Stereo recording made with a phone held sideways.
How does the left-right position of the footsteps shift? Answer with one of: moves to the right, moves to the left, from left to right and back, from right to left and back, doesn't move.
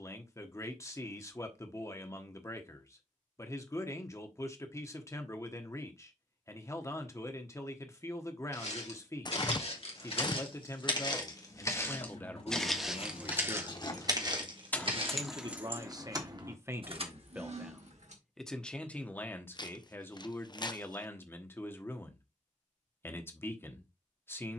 moves to the right.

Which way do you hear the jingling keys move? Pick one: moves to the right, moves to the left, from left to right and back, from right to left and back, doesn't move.
moves to the right.